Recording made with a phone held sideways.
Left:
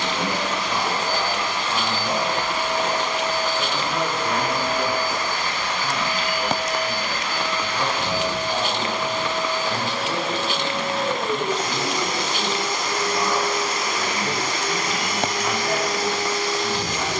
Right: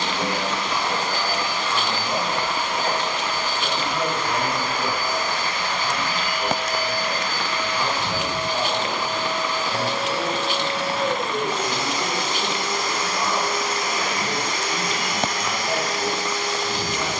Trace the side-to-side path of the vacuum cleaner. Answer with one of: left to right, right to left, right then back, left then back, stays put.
stays put.